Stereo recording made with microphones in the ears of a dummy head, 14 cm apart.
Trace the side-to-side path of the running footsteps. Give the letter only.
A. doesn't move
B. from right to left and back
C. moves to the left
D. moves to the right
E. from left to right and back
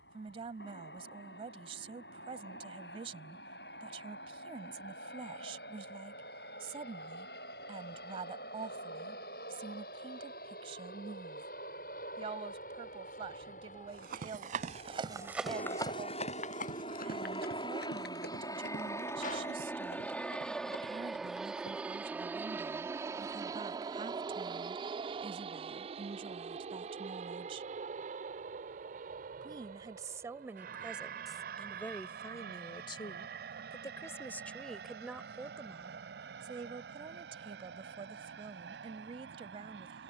C.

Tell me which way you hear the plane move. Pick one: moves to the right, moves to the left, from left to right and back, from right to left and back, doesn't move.
moves to the right.